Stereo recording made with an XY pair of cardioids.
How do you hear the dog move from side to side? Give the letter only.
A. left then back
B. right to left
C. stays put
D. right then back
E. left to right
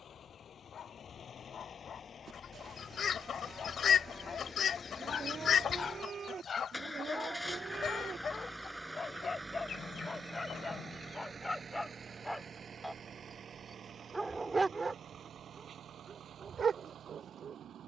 E.